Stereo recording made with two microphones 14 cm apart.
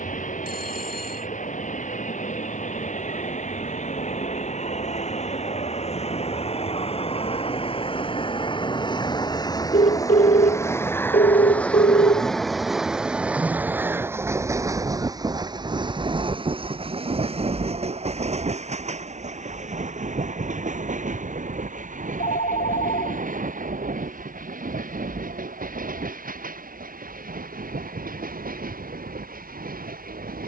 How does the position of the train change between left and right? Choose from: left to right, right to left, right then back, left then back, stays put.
left to right.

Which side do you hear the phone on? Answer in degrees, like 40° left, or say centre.
80° left.